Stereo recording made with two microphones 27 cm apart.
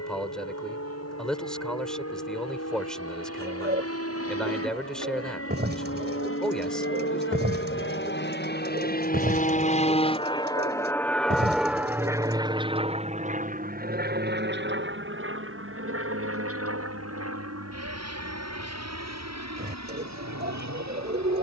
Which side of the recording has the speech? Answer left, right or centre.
centre.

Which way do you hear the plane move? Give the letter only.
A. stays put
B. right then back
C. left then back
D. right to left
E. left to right
E.